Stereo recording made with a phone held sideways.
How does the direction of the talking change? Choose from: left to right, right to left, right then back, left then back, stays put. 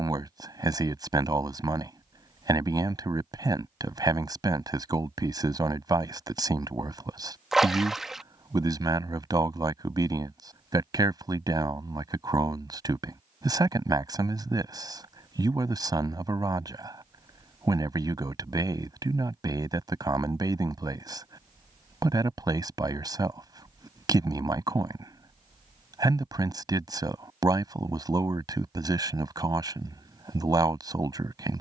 stays put.